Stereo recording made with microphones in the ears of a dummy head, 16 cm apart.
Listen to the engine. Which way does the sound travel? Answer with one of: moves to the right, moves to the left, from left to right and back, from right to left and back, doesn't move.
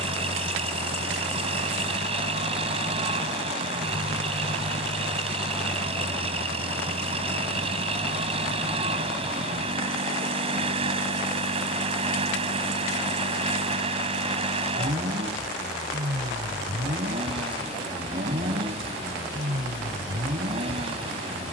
doesn't move.